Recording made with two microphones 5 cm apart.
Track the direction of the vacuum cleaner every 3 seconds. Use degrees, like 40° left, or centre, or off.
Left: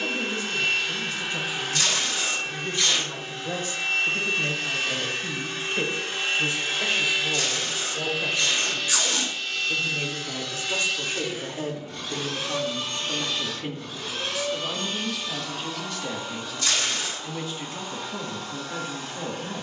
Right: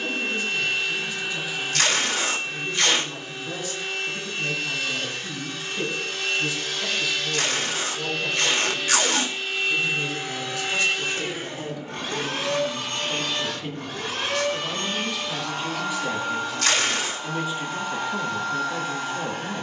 60° left, 50° left, 20° left, 30° right, 60° right, 70° right, 70° right.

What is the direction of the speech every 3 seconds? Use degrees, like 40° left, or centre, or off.
50° left, 50° left, 40° left, 30° left, 20° left, 10° right, 10° right.